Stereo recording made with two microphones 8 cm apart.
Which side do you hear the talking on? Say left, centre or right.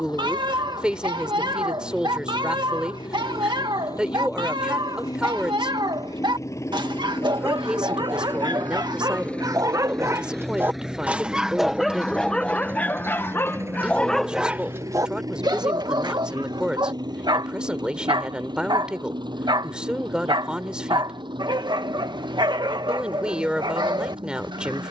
centre.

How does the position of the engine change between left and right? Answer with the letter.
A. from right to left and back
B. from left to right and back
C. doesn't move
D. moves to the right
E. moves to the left
D.